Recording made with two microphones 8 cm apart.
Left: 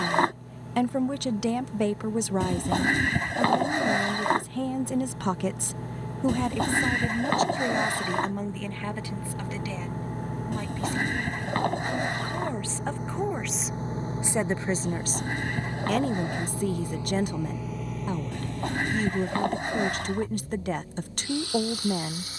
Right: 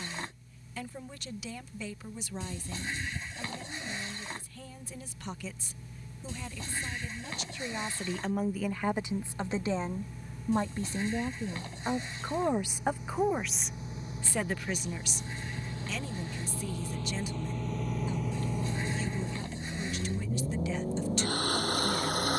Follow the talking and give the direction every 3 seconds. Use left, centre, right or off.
left, left, left, right, centre, left, left, left.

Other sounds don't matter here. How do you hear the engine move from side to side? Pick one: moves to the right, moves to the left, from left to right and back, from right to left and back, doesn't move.
moves to the right.